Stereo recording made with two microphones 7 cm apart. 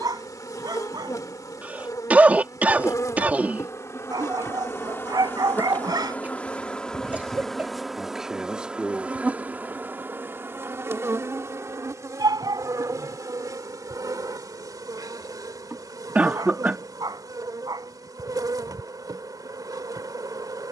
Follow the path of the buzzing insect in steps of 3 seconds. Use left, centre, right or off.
left, left, centre, right, right, right, right.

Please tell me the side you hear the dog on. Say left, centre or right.
right.